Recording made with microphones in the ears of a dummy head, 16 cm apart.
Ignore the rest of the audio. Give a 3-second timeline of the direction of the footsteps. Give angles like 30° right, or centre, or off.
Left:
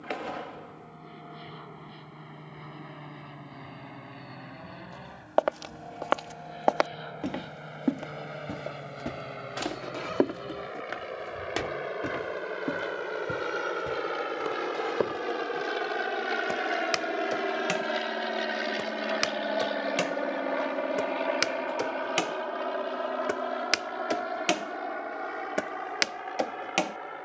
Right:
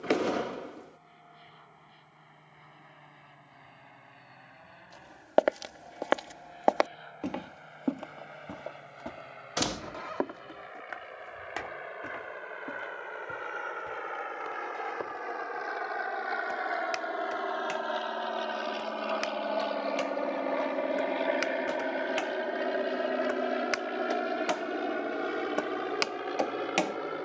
off, 20° right, centre, 40° left, 60° left, 70° left, 70° left, 50° left, 20° left.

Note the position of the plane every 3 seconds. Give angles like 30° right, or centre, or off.
70° left, 70° left, 70° left, 60° left, 50° left, 40° left, 10° left, 20° right, 40° right.